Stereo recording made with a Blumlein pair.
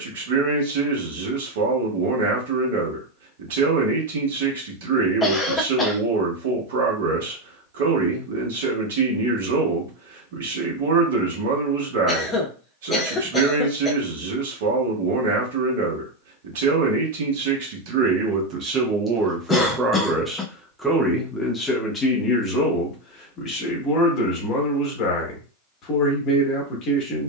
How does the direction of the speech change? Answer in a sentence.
You can hear the speech move to the left.